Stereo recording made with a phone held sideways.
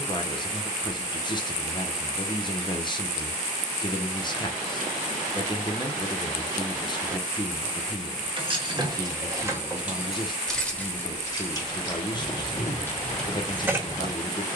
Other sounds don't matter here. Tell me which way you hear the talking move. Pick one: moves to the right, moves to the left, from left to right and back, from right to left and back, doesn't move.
doesn't move.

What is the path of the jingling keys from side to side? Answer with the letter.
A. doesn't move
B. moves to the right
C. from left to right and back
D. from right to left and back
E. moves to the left
D.